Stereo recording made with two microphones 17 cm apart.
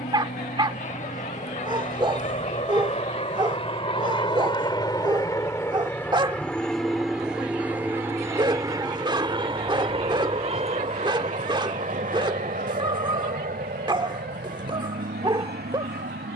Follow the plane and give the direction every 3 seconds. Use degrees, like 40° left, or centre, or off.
50° left, 30° left, 10° right, 30° right, 50° right, 60° right.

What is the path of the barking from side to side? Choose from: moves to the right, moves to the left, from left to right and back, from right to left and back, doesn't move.
doesn't move.